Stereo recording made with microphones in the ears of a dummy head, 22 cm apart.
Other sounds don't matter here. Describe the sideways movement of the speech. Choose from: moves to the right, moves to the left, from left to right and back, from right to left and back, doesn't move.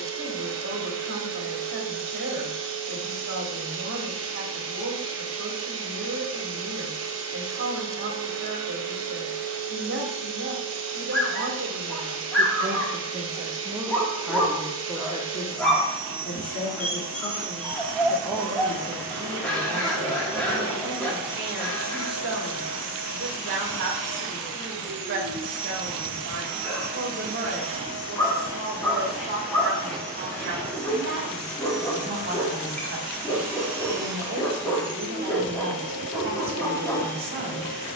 from right to left and back.